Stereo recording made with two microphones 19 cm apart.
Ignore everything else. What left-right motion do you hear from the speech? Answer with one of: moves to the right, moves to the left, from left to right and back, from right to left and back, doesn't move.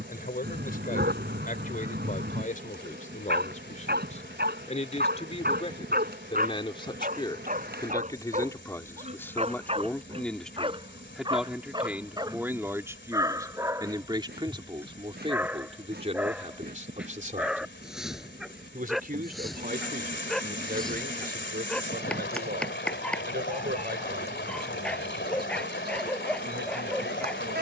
moves to the right.